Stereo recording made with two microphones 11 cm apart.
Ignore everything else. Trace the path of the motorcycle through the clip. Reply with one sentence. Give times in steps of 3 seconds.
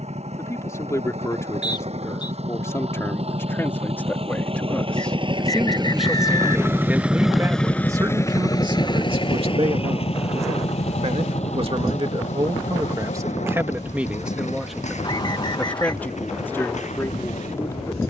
In this clip you hear the motorcycle on the right from 0 s, in the centre from 6 s and on the left from 9 s.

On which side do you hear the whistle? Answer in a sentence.
You can hear the whistle on the left.